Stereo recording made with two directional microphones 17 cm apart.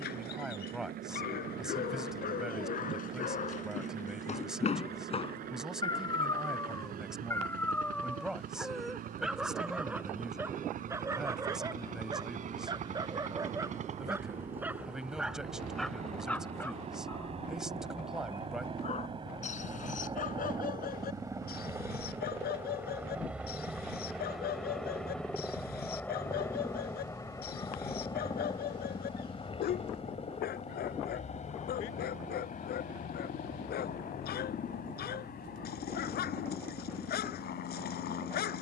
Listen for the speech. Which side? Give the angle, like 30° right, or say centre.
centre.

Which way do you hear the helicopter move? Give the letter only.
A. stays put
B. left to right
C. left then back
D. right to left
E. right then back
D.